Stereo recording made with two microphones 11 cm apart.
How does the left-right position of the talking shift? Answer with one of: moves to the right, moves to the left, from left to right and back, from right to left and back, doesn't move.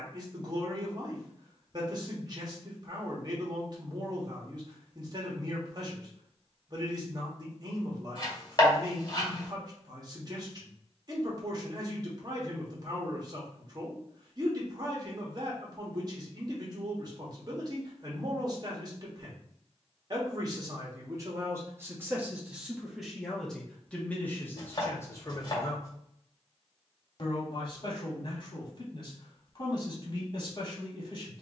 moves to the left.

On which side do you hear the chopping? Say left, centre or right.
left.